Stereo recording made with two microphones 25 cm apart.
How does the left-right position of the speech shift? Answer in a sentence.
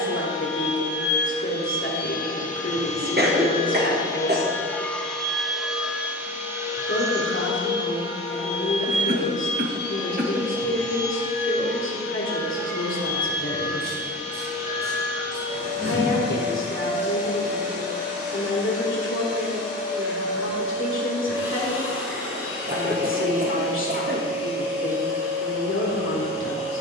You can hear the speech stay in one place.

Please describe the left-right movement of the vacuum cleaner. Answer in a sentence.
In this clip you hear the vacuum cleaner go from the left side to the right.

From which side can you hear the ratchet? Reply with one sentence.
You can hear the ratchet on the right.